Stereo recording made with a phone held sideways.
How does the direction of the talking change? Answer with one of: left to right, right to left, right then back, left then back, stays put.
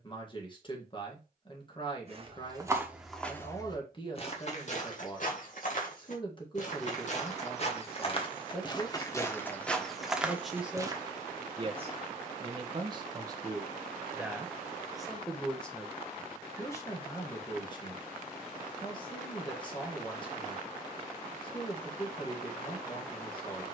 right then back.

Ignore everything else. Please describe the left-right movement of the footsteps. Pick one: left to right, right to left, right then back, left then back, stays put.
left then back.